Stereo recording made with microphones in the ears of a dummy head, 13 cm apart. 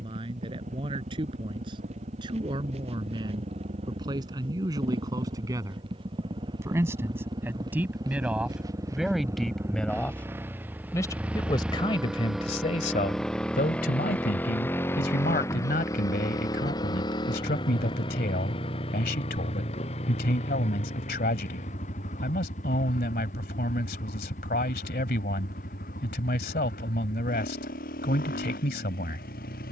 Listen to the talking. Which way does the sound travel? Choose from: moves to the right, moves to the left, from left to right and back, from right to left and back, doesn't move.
moves to the left.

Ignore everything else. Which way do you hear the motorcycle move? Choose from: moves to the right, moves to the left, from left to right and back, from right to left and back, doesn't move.
moves to the left.